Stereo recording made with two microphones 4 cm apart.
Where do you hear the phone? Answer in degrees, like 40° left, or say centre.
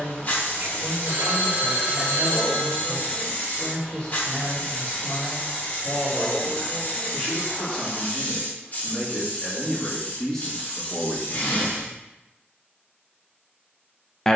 60° right.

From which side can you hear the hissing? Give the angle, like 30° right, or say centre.
40° left.